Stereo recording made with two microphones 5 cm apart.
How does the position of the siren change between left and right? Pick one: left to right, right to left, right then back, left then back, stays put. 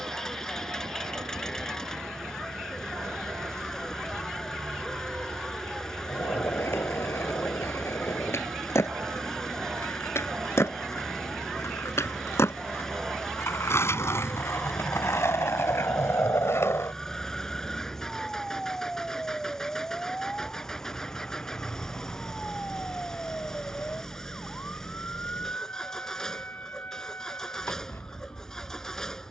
right to left.